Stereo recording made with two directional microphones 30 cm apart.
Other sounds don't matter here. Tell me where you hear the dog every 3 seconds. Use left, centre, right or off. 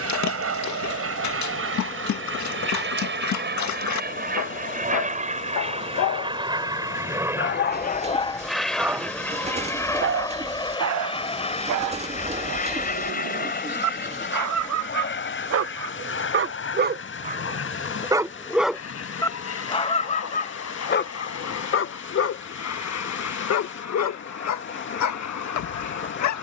left, left, left, right, right, right, centre, left, left.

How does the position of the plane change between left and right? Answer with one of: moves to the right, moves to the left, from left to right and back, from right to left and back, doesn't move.
moves to the left.